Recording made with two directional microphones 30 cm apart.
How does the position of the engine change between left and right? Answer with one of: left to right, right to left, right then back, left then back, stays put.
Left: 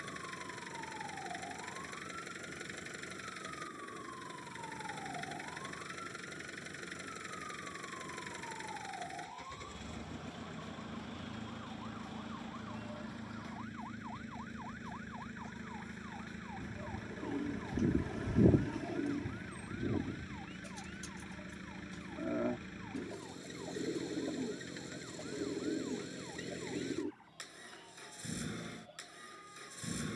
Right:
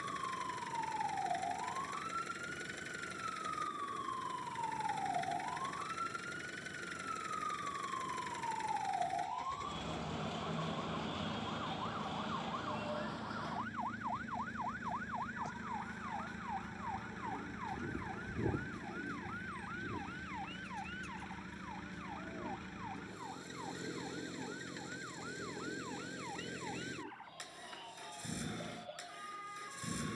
stays put.